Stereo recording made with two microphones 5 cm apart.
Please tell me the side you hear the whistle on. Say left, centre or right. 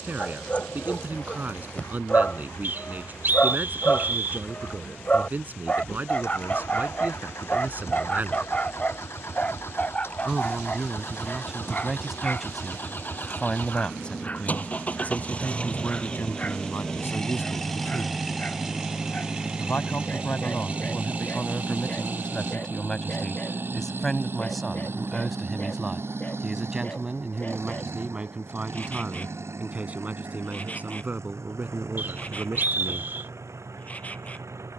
right.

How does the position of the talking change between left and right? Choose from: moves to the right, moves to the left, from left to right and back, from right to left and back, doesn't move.
from right to left and back.